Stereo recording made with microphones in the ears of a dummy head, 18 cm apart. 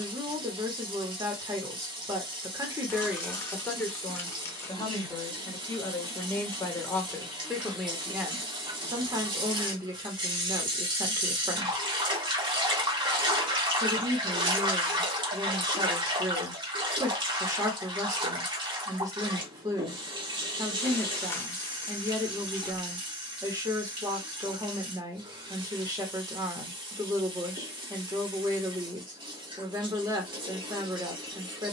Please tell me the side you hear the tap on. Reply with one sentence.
You can hear the tap on the right.